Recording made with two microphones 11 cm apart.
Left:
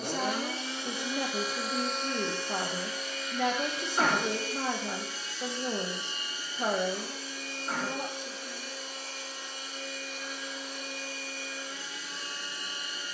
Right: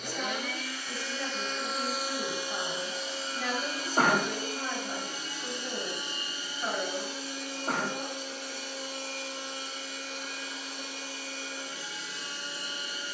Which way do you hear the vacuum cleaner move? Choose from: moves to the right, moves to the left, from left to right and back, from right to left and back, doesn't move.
moves to the right.